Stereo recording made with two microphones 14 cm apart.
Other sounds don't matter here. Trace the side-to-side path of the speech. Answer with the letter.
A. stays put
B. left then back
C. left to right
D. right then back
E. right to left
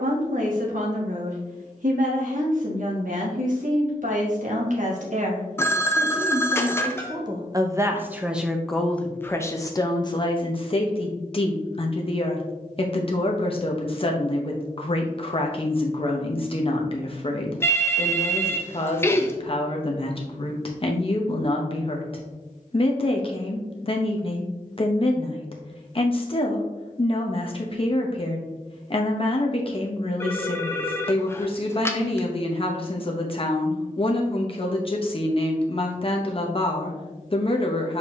E.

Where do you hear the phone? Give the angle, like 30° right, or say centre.
20° left.